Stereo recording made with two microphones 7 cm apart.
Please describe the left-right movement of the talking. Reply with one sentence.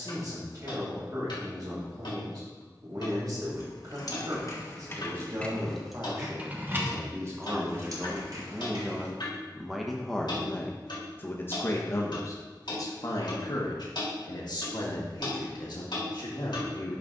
In this clip you hear the talking move to the left.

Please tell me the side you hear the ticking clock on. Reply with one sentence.
You can hear the ticking clock on the left.